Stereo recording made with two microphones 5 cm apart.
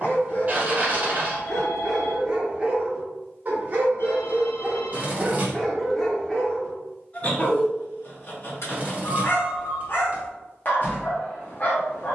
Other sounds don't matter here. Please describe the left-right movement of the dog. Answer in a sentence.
You can hear the dog go right and come back.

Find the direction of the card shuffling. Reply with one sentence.
In this clip you hear the card shuffling on the right.